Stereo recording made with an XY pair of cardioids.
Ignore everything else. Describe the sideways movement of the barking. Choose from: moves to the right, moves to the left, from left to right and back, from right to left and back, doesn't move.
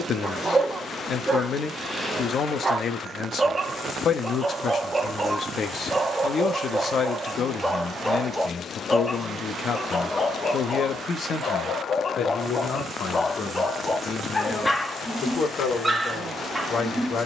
from right to left and back.